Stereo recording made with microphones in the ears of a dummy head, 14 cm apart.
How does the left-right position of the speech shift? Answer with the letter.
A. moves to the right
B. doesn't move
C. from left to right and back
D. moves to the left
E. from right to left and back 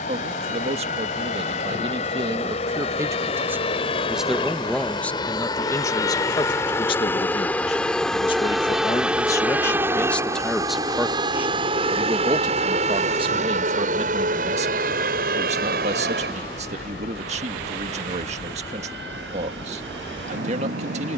E.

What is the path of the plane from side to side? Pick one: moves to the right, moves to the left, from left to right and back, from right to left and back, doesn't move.
moves to the right.